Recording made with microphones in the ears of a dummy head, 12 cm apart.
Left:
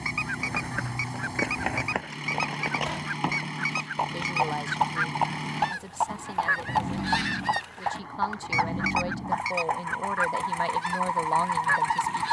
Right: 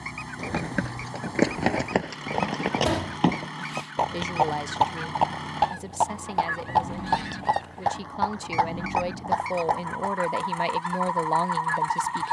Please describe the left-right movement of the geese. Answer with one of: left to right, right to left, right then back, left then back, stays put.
stays put.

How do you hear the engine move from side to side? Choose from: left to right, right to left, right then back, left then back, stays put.
stays put.